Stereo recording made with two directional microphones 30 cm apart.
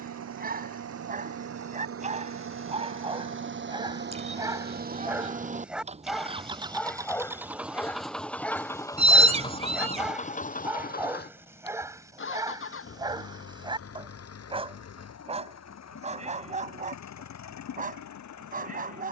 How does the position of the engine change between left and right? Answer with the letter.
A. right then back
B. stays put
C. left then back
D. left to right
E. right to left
E.